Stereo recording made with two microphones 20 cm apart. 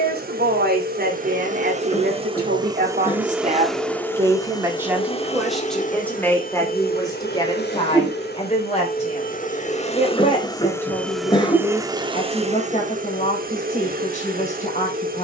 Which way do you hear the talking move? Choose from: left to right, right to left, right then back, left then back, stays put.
right to left.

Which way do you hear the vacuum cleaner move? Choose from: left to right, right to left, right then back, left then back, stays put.
left then back.